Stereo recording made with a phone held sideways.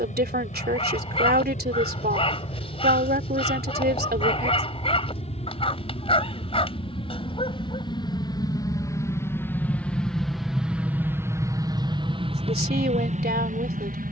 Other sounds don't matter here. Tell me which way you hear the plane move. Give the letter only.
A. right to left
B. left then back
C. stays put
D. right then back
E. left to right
E.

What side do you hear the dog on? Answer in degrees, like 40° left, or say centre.
40° left.